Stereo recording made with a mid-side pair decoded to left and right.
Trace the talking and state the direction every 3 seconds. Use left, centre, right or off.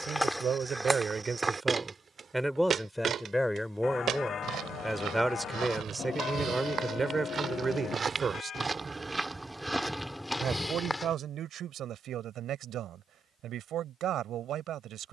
right, centre, right, right, right.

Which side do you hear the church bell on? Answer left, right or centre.
left.